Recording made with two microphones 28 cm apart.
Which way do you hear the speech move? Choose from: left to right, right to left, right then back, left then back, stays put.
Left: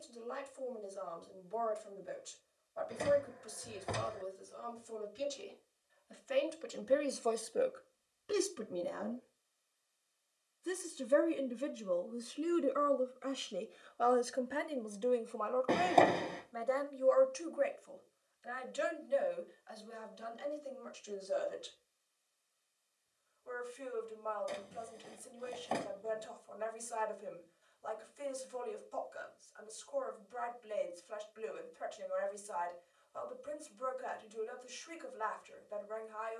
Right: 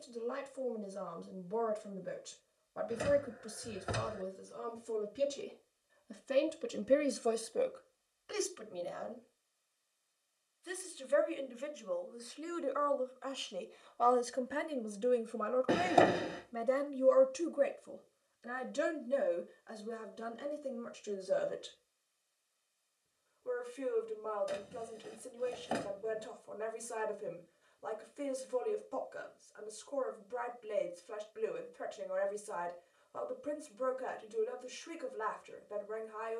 left then back.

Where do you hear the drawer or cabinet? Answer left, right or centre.
centre.